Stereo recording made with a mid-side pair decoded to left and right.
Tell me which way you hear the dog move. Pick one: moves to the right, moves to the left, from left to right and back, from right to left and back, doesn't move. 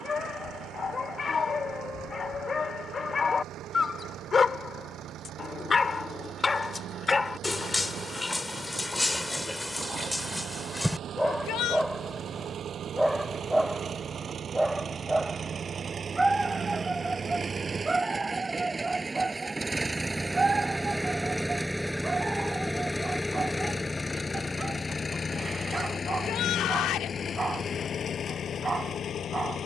moves to the right.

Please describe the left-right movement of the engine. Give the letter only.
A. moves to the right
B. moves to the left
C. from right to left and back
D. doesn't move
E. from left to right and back
B.